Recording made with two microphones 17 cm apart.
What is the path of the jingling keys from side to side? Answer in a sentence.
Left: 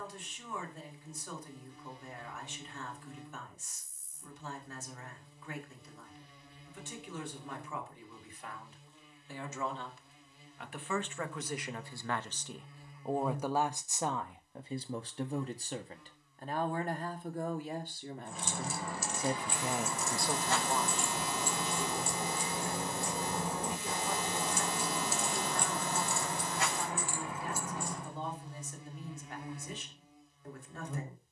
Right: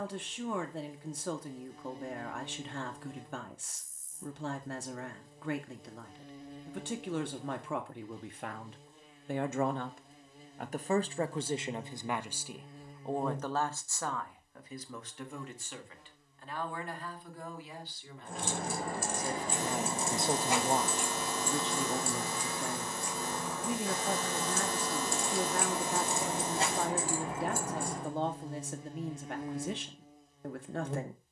You can hear the jingling keys move from right to left and back again.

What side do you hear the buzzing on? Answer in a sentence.
You can hear the buzzing on the right.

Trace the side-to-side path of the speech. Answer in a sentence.
You can hear the speech move from right to left and back again.